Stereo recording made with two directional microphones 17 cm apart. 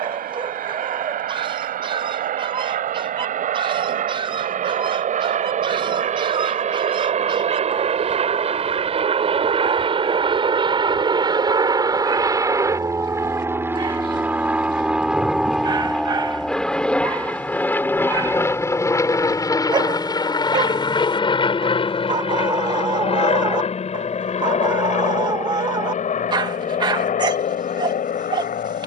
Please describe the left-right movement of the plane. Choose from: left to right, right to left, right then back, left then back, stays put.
right to left.